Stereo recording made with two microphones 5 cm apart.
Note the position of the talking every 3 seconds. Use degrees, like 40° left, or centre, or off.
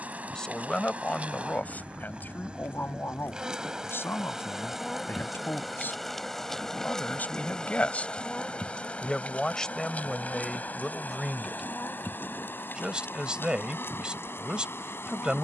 30° left, 50° left, 30° left, centre, 20° right.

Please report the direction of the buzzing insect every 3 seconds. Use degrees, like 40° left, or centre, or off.
30° right, 10° right, 20° left, 40° left, 50° left.